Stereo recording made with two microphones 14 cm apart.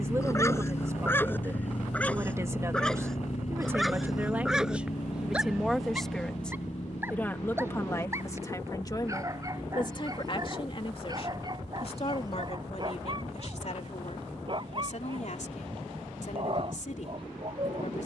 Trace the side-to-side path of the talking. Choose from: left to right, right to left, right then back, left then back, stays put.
right to left.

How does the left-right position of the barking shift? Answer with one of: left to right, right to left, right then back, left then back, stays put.
left to right.